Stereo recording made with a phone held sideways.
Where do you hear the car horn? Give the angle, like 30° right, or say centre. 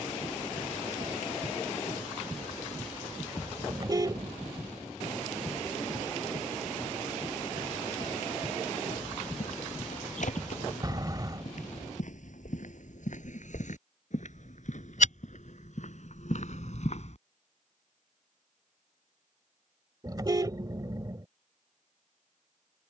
30° right.